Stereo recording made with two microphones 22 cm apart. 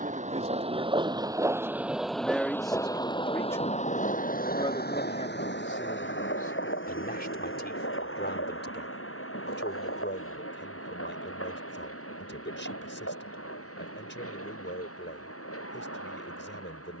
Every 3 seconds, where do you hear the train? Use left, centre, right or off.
centre, left, left, left, left, left.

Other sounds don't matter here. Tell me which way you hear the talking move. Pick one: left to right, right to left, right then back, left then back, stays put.
right to left.